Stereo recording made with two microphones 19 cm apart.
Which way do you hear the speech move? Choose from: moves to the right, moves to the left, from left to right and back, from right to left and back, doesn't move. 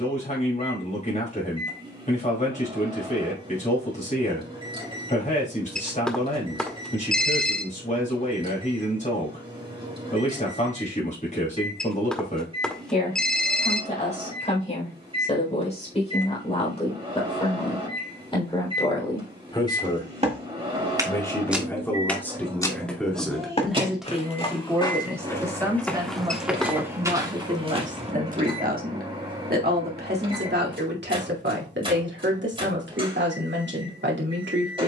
moves to the right.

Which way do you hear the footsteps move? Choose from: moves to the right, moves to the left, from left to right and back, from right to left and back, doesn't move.
from right to left and back.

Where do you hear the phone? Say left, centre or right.
centre.